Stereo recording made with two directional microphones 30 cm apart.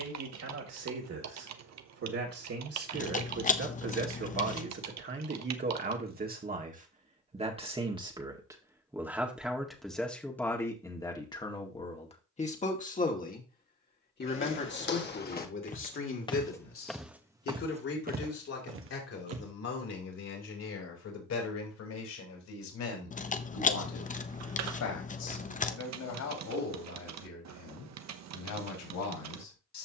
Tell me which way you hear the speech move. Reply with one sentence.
In this clip you hear the speech move from right to left.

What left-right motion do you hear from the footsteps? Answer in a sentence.
You can hear the footsteps move from left to right.